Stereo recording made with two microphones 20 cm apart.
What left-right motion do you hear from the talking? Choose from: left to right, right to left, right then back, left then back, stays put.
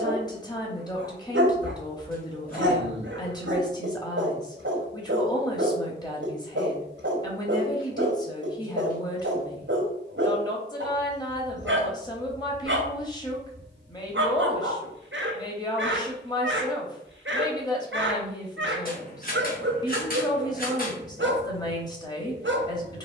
stays put.